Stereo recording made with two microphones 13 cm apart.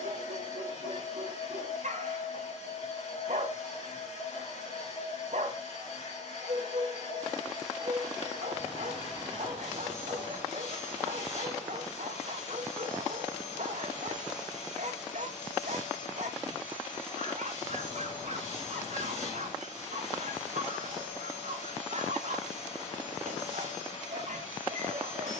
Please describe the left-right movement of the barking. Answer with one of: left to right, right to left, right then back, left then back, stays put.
stays put.